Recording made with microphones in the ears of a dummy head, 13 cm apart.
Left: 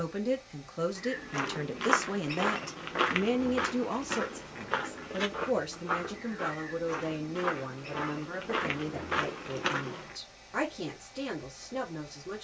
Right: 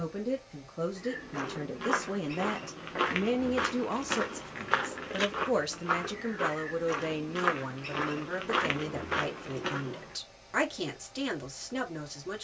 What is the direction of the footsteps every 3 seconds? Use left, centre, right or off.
left, right, right, left.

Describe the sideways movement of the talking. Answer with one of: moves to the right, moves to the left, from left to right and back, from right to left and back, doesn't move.
moves to the right.